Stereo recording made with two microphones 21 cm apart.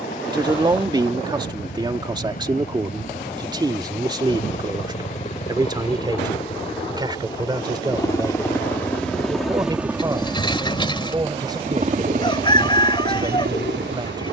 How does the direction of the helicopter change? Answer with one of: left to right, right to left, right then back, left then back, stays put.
left to right.